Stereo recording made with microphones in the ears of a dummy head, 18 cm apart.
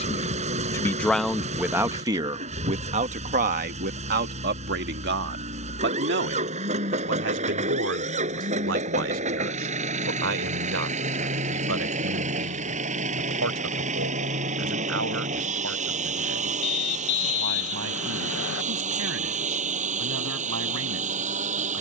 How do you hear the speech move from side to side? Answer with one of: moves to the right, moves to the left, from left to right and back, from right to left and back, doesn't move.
moves to the right.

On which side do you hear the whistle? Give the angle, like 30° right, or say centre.
70° left.